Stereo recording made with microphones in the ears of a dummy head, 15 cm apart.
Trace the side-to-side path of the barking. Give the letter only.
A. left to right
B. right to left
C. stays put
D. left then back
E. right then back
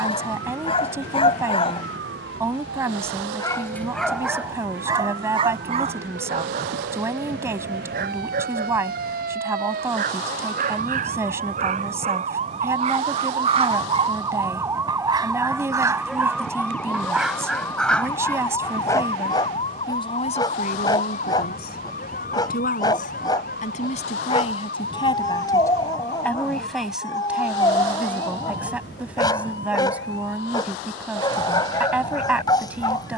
E.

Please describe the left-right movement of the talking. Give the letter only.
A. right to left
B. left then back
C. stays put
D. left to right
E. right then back
B.